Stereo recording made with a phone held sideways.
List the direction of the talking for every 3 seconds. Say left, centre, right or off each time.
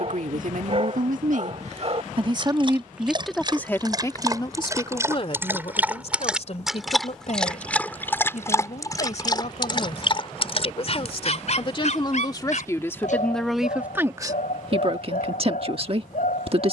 right, left, left, left, centre, right.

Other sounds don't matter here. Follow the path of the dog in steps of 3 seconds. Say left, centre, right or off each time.
right, right, centre, left, left, left.